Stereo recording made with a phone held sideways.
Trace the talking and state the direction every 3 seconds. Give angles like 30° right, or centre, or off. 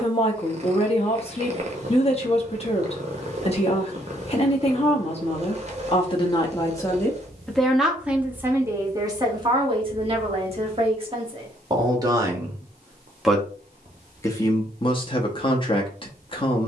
40° left, 40° left, centre, 30° right, centre, 30° left.